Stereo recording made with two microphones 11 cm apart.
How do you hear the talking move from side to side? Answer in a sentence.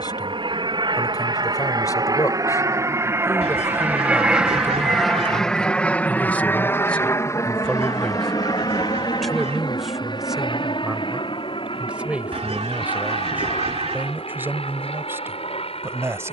In this clip you hear the talking go from the left side to the right.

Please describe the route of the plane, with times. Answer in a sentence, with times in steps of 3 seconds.
In this clip you hear the plane on the right from 0 s, in the centre from 3 s and on the left from 6 s.